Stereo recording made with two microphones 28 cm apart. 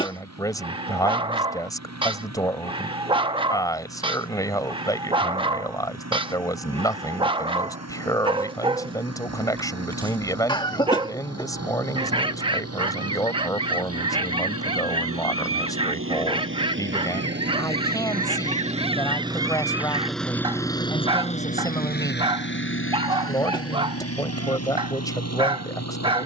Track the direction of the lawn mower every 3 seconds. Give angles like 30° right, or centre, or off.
70° right, 70° right, 70° right, 70° right, 60° right, 50° right, 10° right, 40° left, 70° left.